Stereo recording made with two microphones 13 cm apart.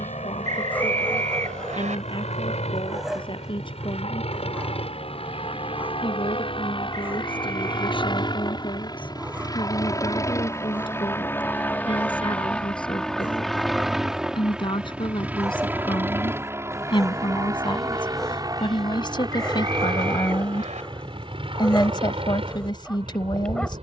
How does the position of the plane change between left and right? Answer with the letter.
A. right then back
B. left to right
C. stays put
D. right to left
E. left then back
B.